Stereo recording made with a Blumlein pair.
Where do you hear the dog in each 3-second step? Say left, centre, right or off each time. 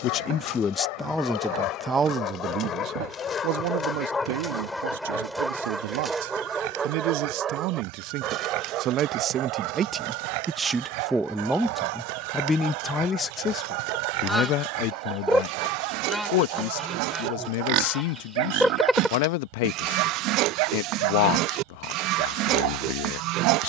left, centre, right, right, right, right, right, right.